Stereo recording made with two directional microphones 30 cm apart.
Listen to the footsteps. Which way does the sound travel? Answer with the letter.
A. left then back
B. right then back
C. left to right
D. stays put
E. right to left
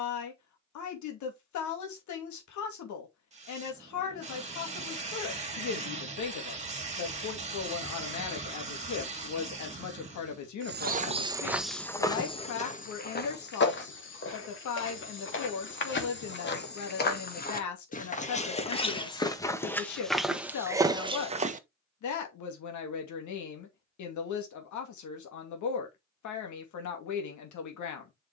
A.